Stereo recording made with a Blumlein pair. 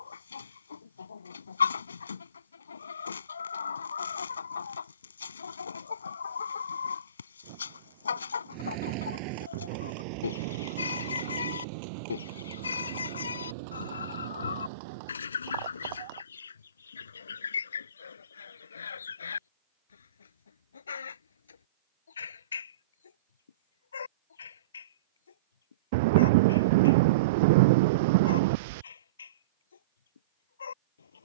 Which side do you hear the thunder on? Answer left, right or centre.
right.